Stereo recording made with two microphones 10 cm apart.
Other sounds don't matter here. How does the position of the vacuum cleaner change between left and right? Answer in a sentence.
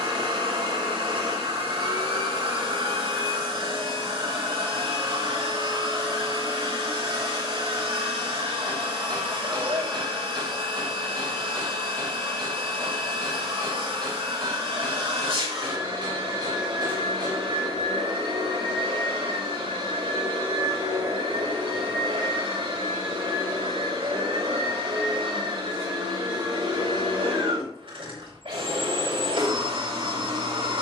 In this clip you hear the vacuum cleaner stay in one place.